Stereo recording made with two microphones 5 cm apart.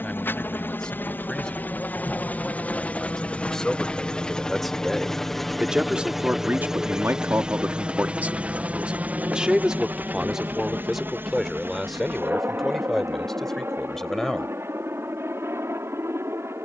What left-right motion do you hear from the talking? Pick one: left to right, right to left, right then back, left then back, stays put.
right then back.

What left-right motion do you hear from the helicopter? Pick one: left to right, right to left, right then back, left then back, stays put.
left to right.